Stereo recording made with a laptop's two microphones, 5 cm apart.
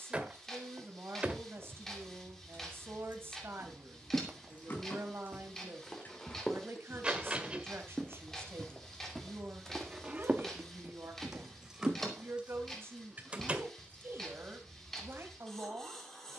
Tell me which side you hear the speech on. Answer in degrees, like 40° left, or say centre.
50° right.